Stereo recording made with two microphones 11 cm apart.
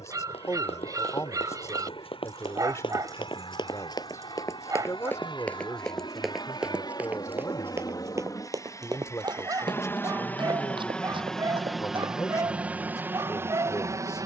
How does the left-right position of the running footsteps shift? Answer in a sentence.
You can hear the running footsteps move from left to right.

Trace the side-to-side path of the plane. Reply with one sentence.
You can hear the plane move to the right.